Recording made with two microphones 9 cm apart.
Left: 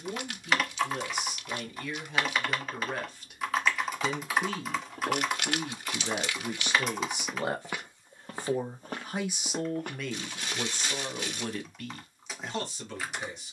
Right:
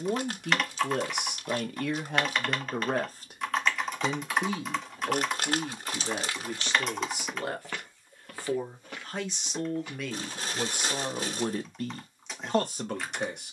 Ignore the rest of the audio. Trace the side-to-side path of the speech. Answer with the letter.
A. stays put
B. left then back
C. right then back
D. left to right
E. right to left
B.